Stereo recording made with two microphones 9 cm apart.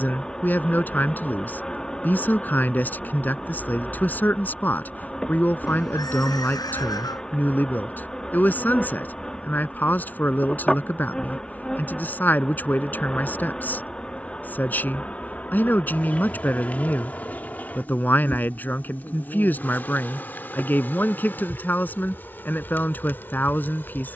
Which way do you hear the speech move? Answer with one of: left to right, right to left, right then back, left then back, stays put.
stays put.